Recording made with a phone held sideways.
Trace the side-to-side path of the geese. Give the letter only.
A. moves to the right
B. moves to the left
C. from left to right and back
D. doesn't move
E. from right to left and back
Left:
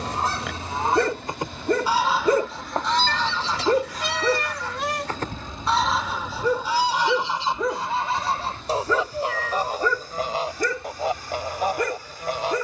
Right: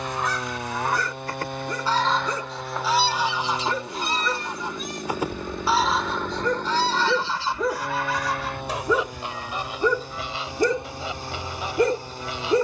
C.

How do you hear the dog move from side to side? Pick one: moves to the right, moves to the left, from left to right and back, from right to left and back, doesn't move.
moves to the right.